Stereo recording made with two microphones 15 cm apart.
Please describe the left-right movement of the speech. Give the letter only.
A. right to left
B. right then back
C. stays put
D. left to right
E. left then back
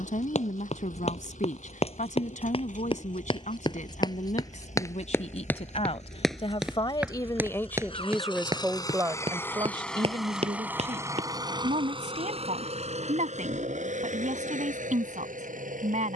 D.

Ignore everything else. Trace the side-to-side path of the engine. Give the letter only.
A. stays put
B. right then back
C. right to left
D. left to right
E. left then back
D.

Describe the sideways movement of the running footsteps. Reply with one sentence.
In this clip you hear the running footsteps move from left to right.